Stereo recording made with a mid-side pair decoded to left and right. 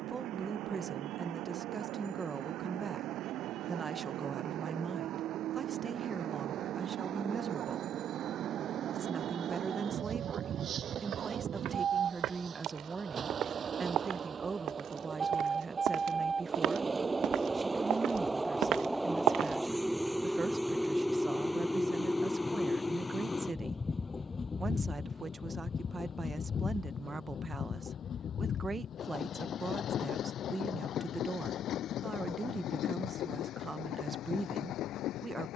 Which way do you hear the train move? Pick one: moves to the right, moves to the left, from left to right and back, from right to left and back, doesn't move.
moves to the left.